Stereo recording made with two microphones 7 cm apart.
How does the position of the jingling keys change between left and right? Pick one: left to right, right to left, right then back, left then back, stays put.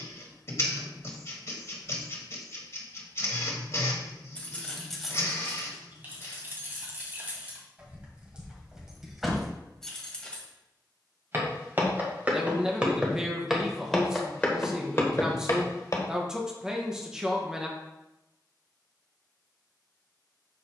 right then back.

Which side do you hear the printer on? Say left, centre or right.
left.